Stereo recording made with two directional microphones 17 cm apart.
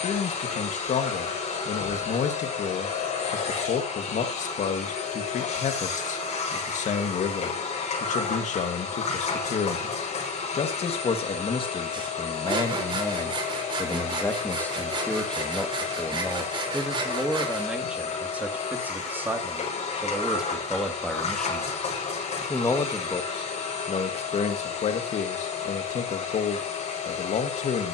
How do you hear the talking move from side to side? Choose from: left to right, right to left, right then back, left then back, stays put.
right then back.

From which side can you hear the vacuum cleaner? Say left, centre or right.
left.